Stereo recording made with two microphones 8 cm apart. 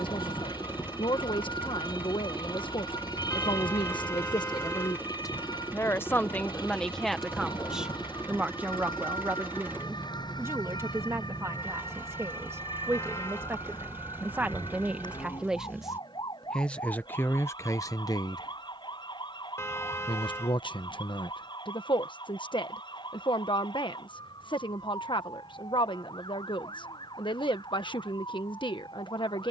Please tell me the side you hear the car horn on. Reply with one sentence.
You can hear the car horn on the left.